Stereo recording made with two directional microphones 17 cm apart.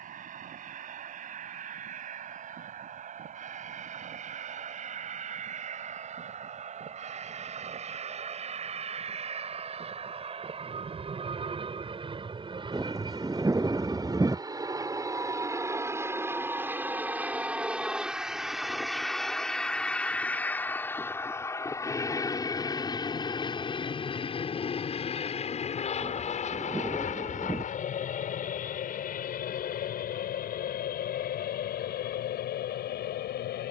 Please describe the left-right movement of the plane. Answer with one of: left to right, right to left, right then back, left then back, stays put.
right to left.